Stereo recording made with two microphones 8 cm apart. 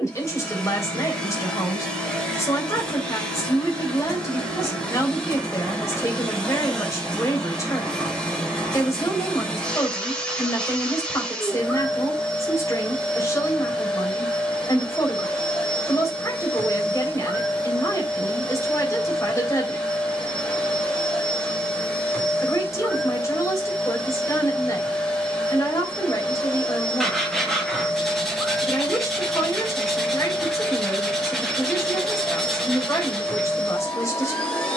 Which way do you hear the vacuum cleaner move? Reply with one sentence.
In this clip you hear the vacuum cleaner stay put.